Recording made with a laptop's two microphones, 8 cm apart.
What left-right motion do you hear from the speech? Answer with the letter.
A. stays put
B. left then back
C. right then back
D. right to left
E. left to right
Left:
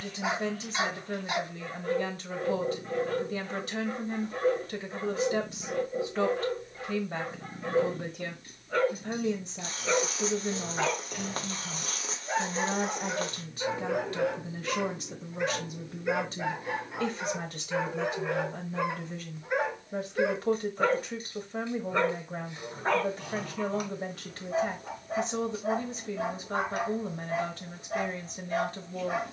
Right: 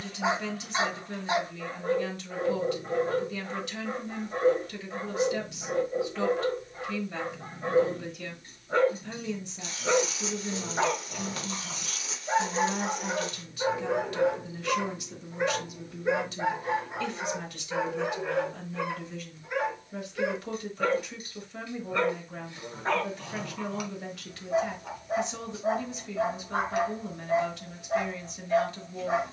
A.